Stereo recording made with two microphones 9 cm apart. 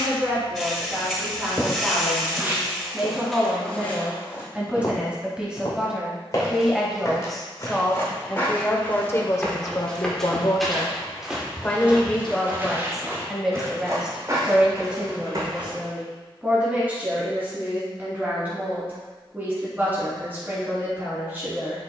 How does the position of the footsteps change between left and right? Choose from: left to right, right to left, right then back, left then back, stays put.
left then back.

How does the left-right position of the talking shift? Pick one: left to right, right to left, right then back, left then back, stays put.
left then back.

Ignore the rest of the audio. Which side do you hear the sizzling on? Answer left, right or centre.
centre.